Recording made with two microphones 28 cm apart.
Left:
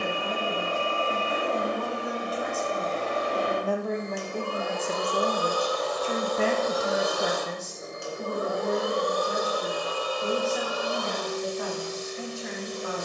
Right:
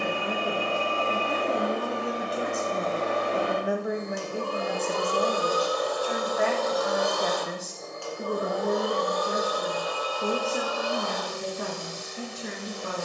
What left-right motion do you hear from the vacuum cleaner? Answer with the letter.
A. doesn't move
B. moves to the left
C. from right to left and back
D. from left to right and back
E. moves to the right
B.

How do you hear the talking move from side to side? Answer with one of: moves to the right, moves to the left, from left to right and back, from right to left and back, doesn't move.
from right to left and back.